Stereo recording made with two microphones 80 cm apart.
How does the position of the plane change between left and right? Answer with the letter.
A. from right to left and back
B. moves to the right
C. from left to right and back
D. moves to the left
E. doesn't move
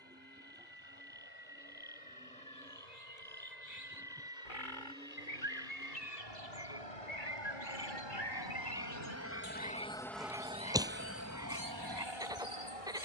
B.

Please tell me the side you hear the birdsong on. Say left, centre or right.
left.